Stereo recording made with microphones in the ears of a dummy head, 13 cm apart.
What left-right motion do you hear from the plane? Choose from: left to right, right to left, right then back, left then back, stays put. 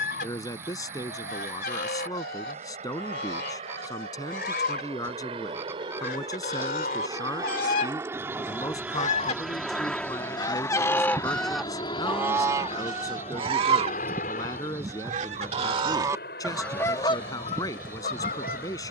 right to left.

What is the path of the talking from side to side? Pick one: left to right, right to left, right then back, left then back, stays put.
stays put.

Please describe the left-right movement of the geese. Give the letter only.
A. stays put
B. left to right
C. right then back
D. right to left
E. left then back
C.